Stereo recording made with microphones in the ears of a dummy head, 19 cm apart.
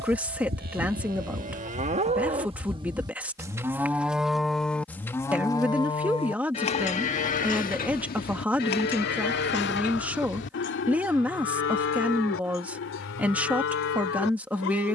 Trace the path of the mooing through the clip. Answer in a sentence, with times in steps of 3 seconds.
In this clip you hear the mooing on the right from 0 s, in the centre from 3 s and on the left from 6 s.